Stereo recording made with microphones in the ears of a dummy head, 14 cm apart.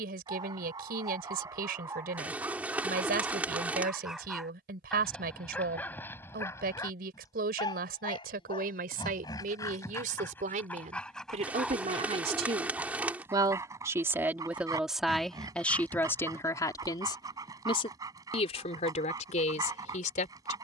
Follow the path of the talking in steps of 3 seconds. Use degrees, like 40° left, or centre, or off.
60° right, 60° right, 60° right, 50° right, 20° right, 20° left, 50° left.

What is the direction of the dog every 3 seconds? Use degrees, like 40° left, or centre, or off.
20° right, centre, 20° left, 10° left, 20° right, 20° right, 20° right.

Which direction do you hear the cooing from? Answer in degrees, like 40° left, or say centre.
10° right.